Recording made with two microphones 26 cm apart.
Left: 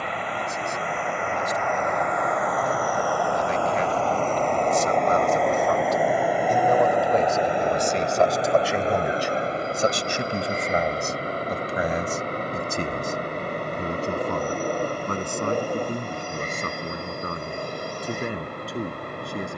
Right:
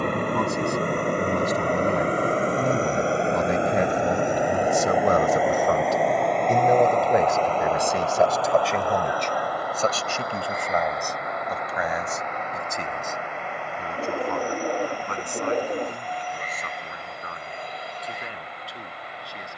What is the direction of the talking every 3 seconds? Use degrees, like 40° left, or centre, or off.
70° right, 50° right, 10° right, 20° left, 40° left, 50° left, 50° left.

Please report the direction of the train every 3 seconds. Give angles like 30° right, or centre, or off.
40° right, 10° right, 10° left, 30° left, 40° left, 50° left, 50° left.